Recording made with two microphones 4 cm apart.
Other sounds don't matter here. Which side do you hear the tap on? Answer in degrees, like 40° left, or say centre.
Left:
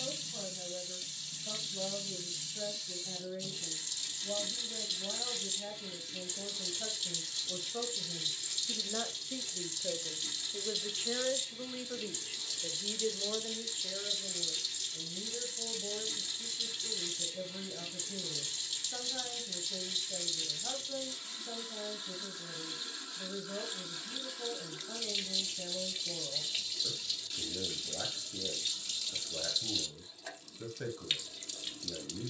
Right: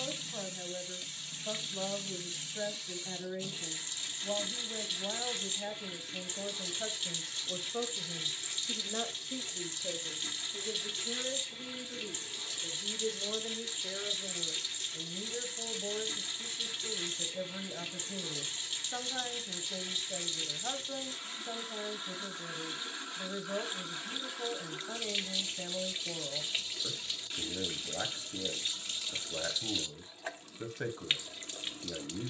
30° right.